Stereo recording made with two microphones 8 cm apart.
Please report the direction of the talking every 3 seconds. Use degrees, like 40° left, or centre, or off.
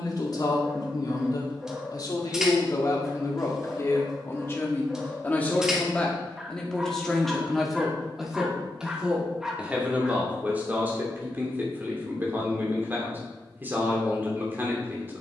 50° left, 30° left, centre, 20° right, 20° right.